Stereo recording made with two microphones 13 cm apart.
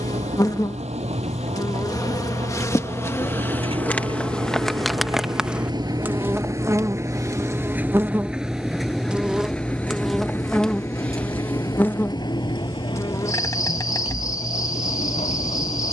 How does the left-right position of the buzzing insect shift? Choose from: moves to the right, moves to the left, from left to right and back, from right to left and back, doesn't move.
from left to right and back.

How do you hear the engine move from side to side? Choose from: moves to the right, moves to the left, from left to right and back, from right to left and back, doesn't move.
moves to the left.